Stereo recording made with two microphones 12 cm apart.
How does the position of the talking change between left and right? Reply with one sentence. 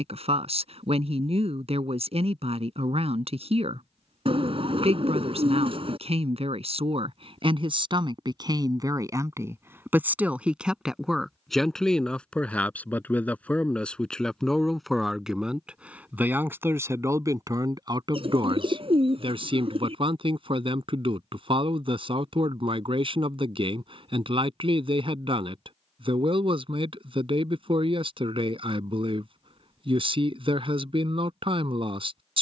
You can hear the talking move from right to left and back again.